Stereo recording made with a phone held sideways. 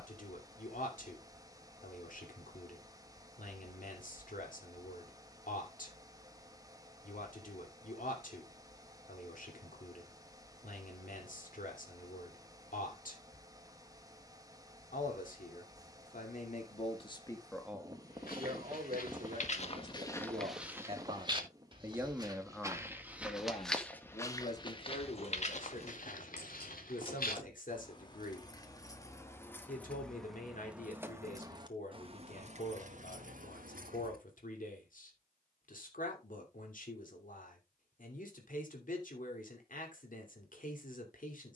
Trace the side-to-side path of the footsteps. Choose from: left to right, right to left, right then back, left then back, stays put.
right then back.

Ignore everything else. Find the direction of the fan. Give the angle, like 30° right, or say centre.
20° right.